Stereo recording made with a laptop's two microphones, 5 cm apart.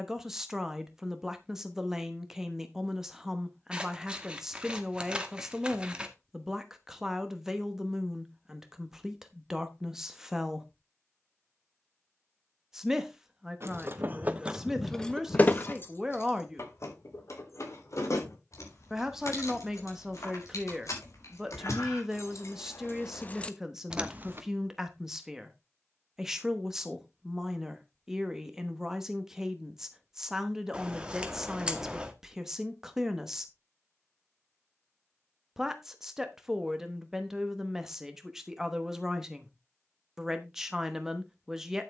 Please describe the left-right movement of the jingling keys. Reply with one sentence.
You can hear the jingling keys move from right to left and back again.